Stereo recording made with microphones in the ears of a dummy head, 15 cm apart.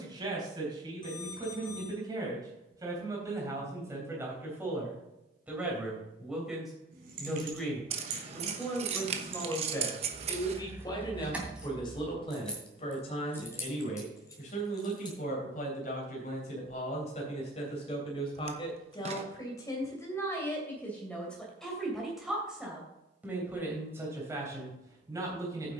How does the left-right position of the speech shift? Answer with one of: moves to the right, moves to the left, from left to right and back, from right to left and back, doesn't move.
from right to left and back.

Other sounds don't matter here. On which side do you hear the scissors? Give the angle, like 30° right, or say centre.
40° right.